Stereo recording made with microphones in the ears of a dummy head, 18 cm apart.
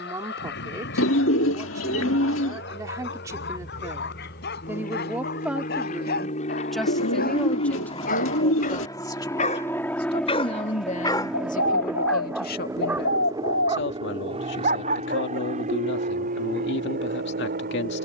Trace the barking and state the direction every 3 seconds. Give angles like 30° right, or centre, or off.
60° left, 60° left, 50° left, 20° left, 20° right, 60° right.